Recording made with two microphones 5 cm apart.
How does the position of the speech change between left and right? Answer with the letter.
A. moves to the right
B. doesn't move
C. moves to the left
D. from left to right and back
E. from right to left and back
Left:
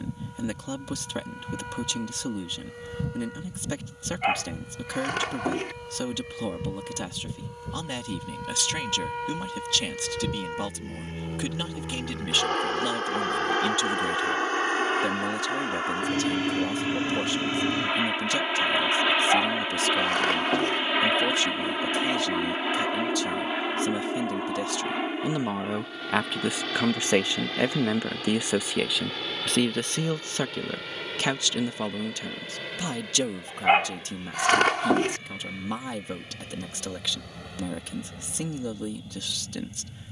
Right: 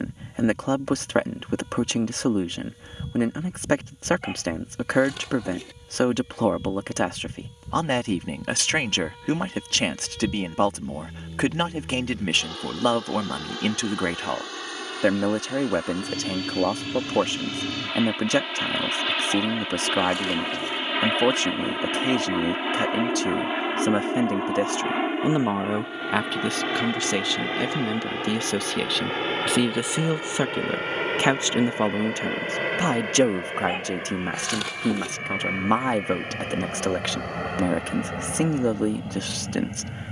E.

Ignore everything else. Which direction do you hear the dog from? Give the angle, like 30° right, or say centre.
60° left.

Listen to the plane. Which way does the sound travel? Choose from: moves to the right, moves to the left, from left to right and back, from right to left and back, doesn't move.
moves to the right.